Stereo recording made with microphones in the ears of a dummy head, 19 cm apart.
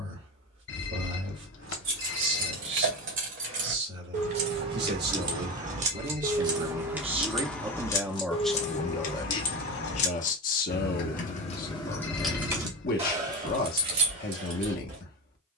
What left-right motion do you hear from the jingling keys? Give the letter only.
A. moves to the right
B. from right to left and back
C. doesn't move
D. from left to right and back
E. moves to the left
B.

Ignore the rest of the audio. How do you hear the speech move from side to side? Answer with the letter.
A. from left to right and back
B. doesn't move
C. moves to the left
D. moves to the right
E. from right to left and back
C.